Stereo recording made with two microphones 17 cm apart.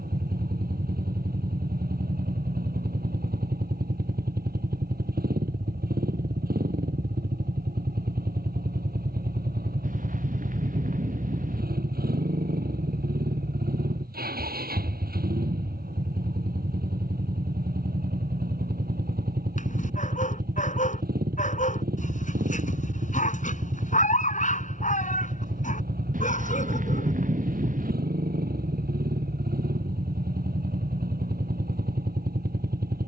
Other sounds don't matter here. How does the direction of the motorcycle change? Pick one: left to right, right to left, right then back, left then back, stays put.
stays put.